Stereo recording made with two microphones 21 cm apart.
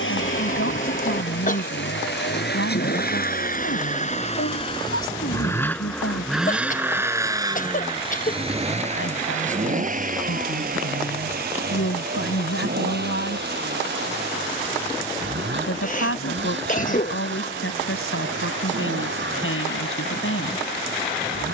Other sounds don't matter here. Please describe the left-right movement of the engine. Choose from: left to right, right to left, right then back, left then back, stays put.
left to right.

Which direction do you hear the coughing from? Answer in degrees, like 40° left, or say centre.
40° left.